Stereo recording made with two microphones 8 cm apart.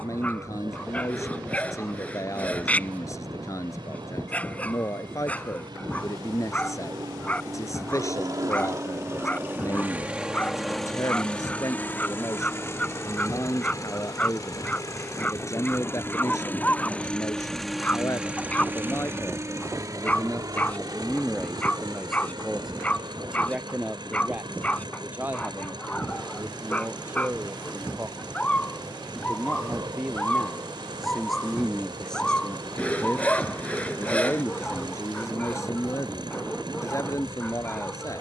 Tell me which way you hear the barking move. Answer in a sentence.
You can hear the barking stay put.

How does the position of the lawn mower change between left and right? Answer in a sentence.
In this clip you hear the lawn mower go left and come back.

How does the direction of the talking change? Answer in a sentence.
You can hear the talking go right and come back.